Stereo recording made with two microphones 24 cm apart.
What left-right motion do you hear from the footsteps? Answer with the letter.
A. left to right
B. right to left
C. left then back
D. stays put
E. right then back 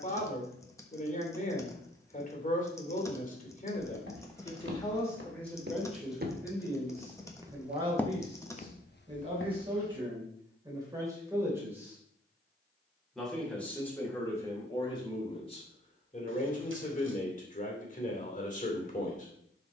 B.